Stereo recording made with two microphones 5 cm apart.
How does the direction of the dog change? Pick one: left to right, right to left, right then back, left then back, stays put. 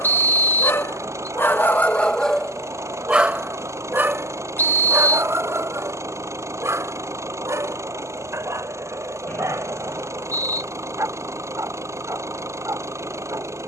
left to right.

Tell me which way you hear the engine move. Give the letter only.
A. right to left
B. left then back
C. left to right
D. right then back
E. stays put
E.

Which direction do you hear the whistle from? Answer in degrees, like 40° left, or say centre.
40° left.